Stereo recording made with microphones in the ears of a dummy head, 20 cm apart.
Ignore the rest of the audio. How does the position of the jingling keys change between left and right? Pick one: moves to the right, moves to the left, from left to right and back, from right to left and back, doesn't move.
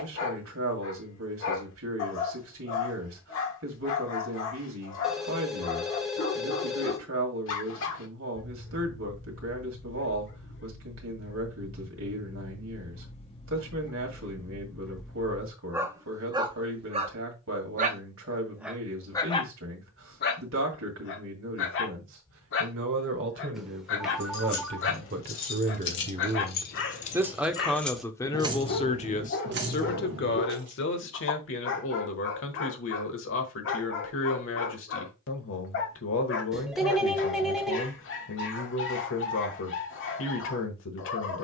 moves to the right.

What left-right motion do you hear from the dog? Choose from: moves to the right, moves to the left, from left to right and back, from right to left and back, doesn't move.
from left to right and back.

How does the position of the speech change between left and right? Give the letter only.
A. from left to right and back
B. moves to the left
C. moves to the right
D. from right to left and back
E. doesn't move
B.